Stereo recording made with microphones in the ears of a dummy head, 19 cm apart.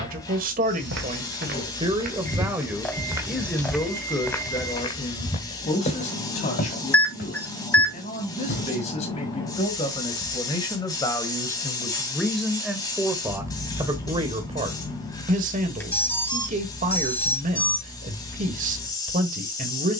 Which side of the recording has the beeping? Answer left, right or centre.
centre.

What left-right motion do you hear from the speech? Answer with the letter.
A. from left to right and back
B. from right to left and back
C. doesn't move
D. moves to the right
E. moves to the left
B.